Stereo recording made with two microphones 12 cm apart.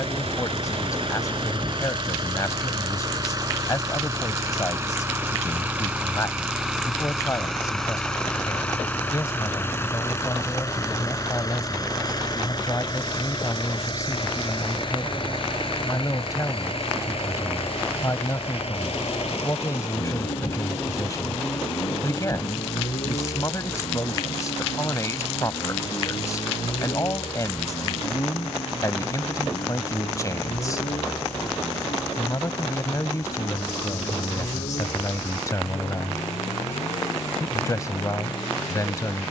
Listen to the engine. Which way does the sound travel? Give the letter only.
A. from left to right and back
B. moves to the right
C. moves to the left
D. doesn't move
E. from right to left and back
C.